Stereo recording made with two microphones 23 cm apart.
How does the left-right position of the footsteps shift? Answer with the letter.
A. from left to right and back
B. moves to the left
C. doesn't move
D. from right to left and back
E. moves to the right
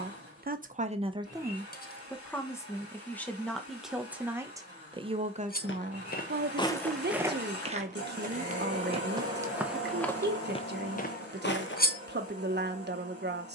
A.